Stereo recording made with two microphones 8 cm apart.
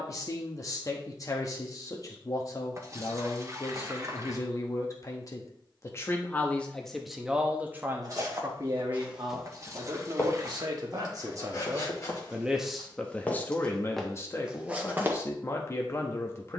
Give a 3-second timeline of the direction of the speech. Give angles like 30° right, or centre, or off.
40° left, 40° left, 10° right, 50° right, 20° left, 30° left.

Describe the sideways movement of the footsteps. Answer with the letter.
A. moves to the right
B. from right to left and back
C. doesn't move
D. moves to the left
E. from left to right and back
B.